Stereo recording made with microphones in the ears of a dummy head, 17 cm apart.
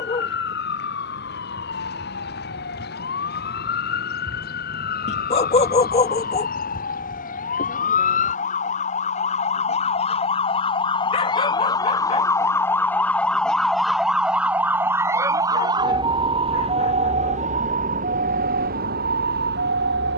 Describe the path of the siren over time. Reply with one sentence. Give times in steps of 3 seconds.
You can hear the siren on the left from 0 s, in the centre from 12 s and on the right from 15 s.